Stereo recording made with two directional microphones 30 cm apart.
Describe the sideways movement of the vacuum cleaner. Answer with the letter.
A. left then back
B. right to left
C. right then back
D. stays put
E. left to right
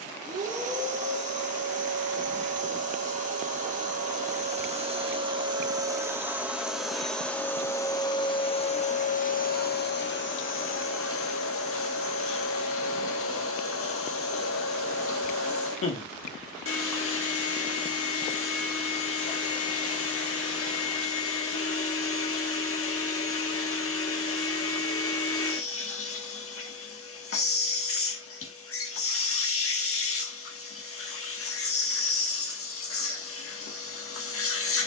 B.